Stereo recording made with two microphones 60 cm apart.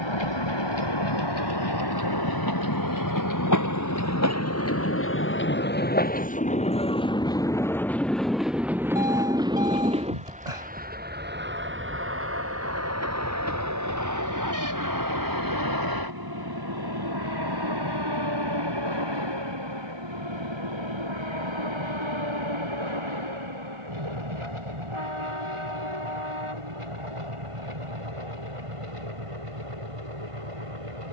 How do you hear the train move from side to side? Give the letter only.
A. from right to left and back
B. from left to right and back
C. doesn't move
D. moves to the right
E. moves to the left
D.